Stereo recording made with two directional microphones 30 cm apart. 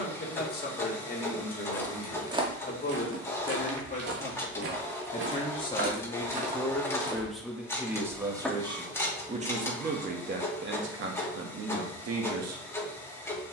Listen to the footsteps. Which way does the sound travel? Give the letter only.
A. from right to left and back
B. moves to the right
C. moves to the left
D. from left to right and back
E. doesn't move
D.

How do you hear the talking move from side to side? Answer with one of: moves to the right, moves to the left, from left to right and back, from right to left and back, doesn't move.
moves to the right.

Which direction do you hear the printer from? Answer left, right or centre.
centre.